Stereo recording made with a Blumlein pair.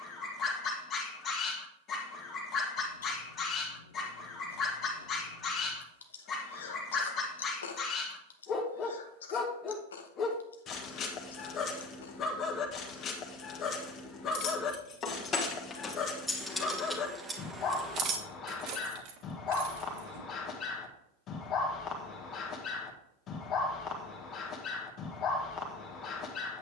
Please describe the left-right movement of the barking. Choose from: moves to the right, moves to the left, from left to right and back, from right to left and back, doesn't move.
doesn't move.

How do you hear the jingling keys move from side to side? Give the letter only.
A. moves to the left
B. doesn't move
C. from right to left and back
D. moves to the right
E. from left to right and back
D.